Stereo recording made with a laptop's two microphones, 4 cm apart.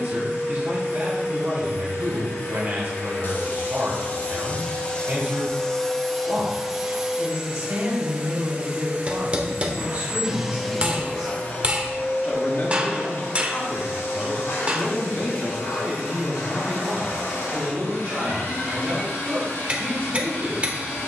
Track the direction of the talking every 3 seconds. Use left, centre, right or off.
right, right, right, right, left, right, right.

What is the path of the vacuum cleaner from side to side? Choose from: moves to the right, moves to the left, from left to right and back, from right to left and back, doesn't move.
from left to right and back.